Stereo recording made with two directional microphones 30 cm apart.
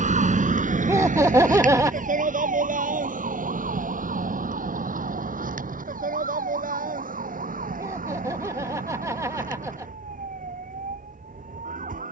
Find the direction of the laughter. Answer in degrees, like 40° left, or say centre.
10° right.